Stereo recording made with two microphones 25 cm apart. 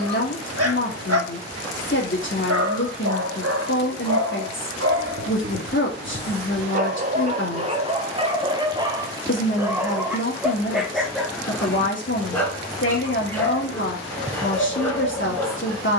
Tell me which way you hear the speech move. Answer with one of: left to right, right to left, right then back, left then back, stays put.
stays put.